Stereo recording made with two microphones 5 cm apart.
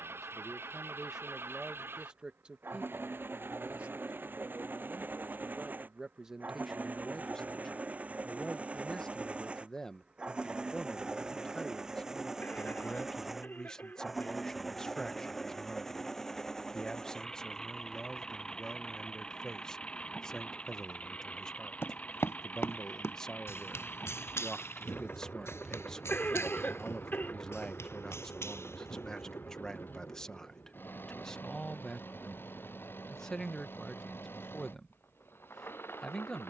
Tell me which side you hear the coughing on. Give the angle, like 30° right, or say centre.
40° left.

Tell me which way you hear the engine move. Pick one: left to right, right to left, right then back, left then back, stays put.
right to left.